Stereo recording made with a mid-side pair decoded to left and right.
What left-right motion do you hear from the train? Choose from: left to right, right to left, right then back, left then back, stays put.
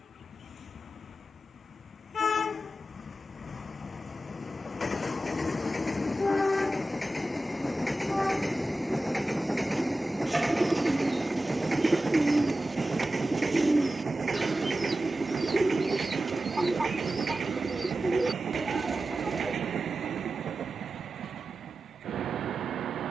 left to right.